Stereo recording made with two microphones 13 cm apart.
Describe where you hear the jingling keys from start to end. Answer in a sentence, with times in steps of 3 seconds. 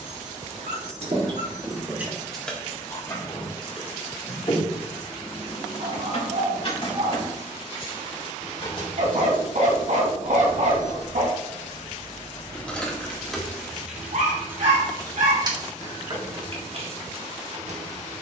You can hear the jingling keys on the right from 0 s, on the left from 3 s, in the centre from 12 s and on the right from 15 s.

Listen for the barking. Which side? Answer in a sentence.
In this clip you hear the barking on the right.